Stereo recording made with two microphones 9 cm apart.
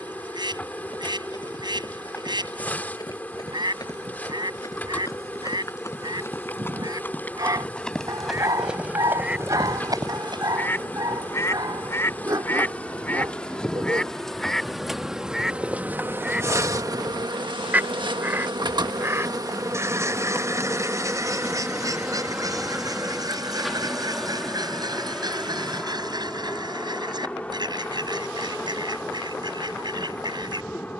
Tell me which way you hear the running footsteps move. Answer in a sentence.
In this clip you hear the running footsteps travel towards the right.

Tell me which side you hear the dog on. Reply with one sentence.
In this clip you hear the dog on the right.